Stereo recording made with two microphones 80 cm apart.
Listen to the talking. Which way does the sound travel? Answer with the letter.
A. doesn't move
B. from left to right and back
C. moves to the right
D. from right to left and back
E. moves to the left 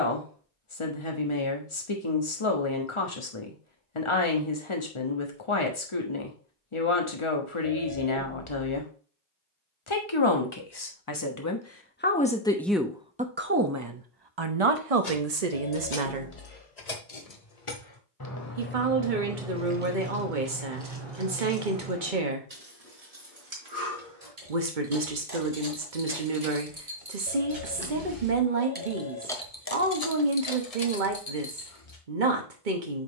C.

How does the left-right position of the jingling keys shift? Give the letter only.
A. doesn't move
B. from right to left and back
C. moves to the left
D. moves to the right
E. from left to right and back
E.